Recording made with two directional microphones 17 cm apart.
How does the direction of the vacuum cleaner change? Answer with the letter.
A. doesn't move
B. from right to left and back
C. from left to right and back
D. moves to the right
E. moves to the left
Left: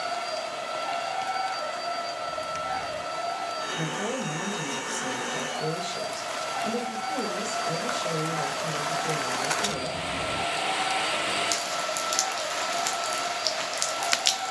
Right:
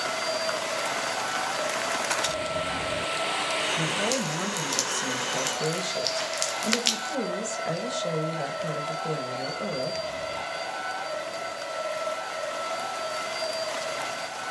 A.